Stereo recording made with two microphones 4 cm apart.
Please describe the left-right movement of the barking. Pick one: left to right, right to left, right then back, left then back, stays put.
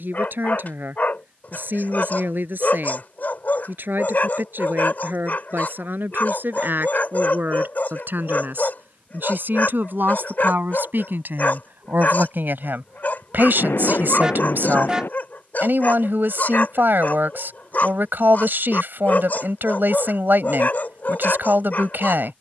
stays put.